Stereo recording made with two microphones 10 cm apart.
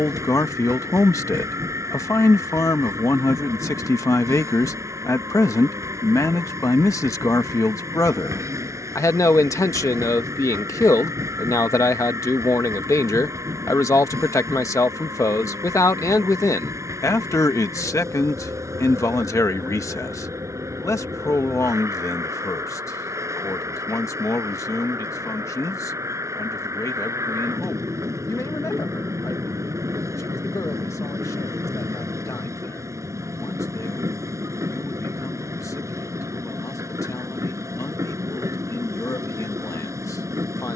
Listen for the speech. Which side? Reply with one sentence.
You can hear the speech on the left.